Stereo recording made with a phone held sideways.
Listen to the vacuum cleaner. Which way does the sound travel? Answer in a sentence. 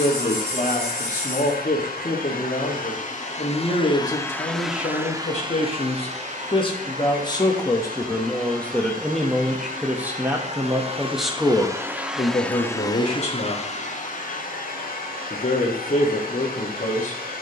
You can hear the vacuum cleaner go right and come back.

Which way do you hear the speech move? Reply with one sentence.
You can hear the speech go right and come back.